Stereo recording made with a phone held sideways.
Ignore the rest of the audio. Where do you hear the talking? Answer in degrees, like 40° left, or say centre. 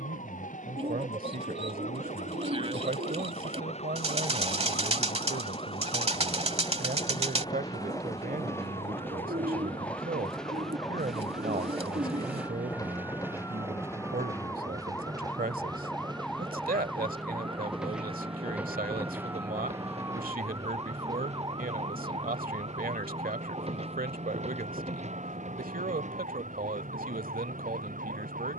60° right.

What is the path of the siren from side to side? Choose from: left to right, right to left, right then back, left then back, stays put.
left to right.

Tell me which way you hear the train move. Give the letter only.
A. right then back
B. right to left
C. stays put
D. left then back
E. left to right
E.